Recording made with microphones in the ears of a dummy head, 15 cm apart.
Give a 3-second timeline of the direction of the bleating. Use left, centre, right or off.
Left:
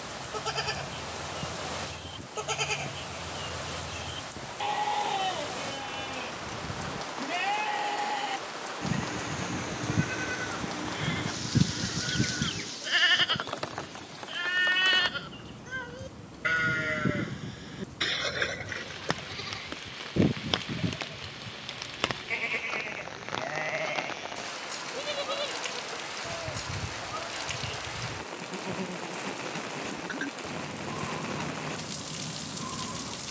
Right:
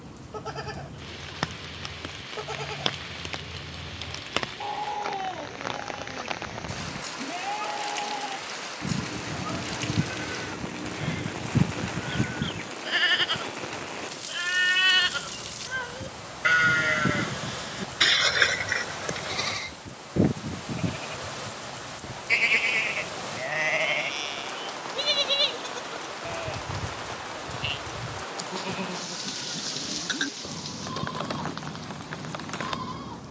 left, left, left, left, centre, right, right, right, right, right, right.